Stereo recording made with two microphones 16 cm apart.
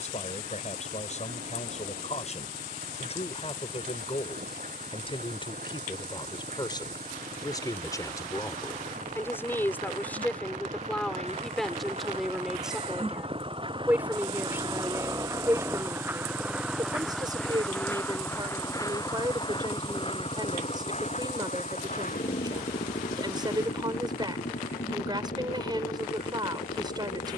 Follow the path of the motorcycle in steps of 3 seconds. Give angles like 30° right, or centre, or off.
70° right, 60° right, 60° right, 50° right, 40° right, 10° right, 30° left, 50° left, 70° left.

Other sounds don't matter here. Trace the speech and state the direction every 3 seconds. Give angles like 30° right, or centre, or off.
50° left, 40° left, 20° left, 10° left, 10° right, 20° right, 30° right, 30° right, 30° right.